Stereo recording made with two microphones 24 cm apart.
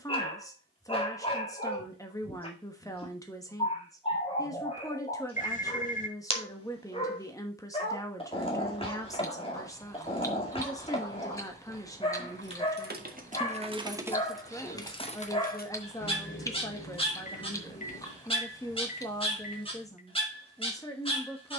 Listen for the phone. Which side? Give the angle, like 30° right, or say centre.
30° left.